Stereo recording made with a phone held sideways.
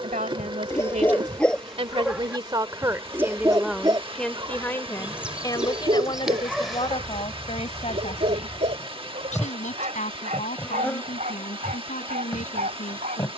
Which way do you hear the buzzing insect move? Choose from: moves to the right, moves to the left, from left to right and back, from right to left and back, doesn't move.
moves to the left.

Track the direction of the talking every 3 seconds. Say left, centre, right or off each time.
right, centre, left, left, left.